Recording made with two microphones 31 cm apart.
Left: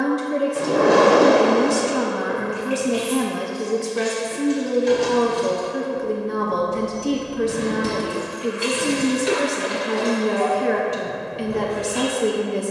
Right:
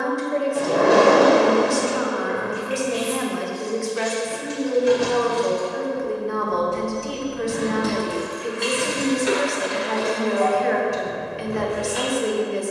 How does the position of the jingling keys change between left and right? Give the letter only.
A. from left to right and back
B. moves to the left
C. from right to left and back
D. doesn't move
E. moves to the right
C.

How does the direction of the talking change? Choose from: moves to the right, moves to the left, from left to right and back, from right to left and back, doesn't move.
doesn't move.